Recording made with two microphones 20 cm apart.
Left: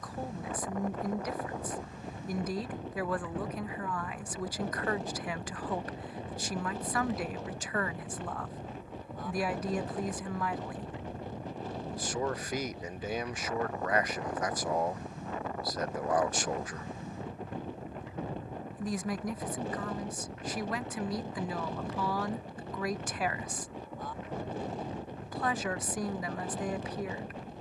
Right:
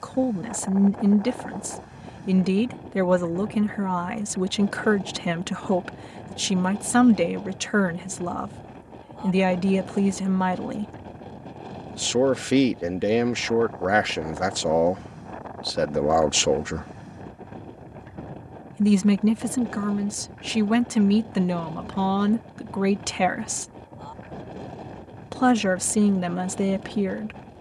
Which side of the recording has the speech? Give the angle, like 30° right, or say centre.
80° right.